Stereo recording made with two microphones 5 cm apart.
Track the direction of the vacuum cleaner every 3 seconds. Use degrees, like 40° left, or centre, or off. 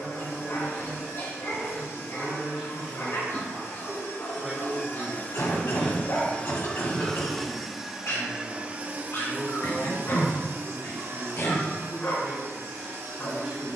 60° left, 50° left, centre, 50° right, 70° right.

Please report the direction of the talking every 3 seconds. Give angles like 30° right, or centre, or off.
10° right, 10° right, 10° left, centre, 20° right.